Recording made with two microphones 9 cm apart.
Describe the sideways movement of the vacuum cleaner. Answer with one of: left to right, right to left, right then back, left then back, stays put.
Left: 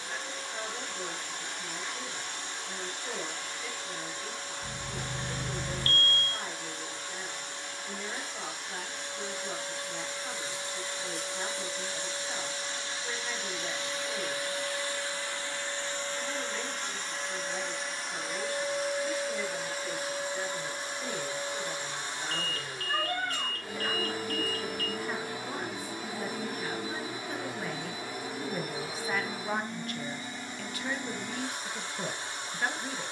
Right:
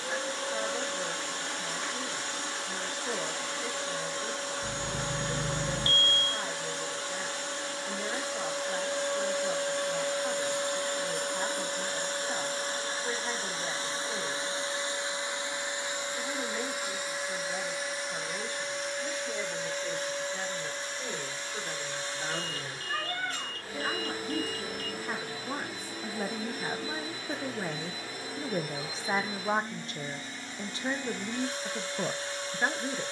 right to left.